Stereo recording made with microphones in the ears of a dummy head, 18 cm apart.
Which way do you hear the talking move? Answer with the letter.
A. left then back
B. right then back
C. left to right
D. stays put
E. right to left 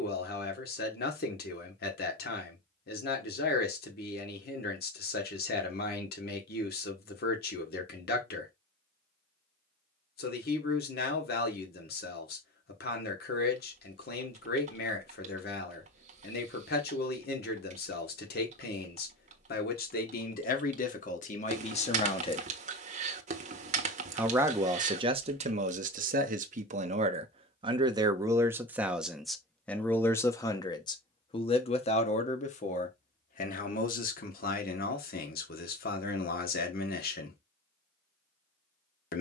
B.